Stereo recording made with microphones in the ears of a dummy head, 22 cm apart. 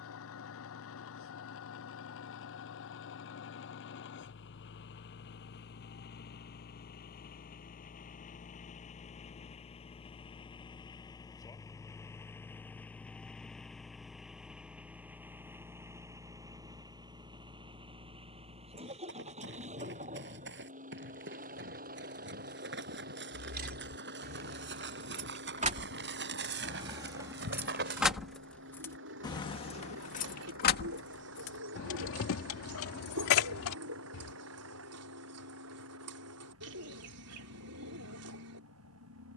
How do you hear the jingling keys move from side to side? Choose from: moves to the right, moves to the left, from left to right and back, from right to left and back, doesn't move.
moves to the left.